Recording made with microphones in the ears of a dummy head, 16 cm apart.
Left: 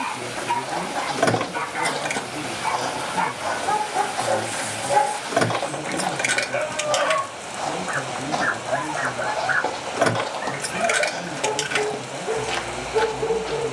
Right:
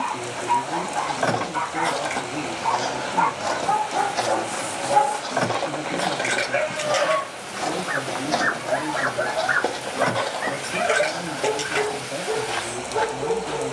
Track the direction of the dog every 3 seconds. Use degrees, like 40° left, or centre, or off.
40° left, 10° left, 30° right, 40° right, 30° left.